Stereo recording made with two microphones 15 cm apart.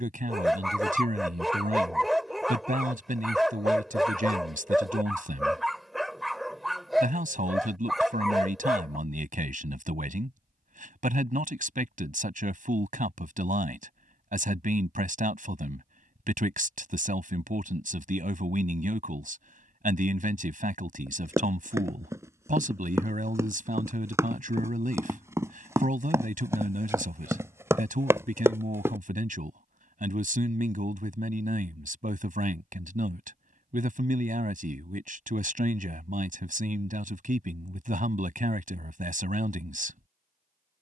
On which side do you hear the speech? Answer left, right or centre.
right.